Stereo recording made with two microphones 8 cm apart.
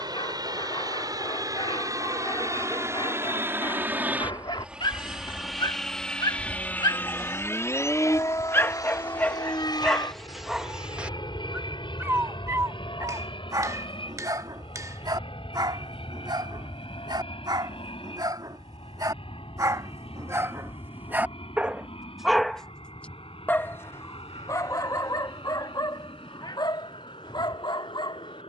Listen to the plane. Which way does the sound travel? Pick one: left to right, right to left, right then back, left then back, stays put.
right to left.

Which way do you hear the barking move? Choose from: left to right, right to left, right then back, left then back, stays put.
right then back.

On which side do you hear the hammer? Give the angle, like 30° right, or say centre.
40° right.